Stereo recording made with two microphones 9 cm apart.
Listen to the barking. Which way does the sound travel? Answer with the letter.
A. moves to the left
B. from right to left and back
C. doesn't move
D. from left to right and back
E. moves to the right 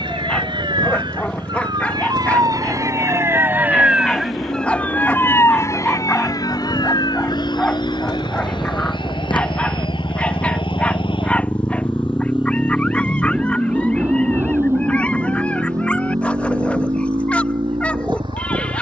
C.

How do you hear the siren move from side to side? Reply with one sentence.
In this clip you hear the siren go from the right side to the left.